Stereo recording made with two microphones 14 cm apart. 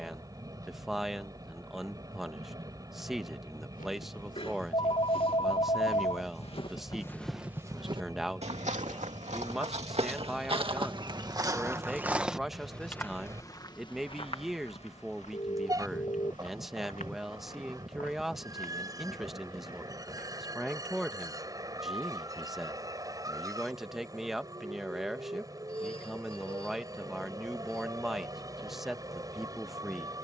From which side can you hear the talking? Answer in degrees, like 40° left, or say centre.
centre.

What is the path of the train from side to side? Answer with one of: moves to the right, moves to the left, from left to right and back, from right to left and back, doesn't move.
doesn't move.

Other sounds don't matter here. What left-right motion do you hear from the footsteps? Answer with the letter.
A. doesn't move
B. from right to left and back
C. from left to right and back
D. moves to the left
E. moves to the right
C.